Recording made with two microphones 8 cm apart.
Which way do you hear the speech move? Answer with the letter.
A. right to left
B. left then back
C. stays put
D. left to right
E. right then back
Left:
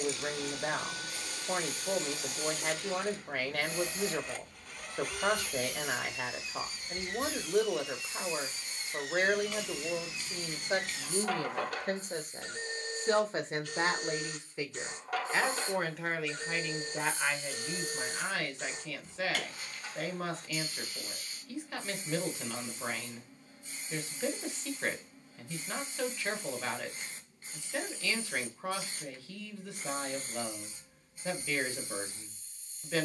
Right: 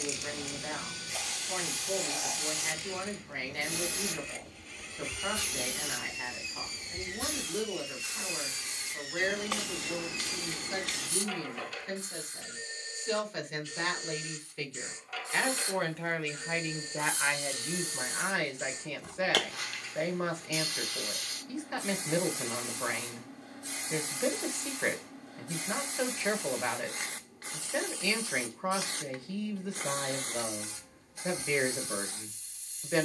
D.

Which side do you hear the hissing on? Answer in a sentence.
In this clip you hear the hissing on the right.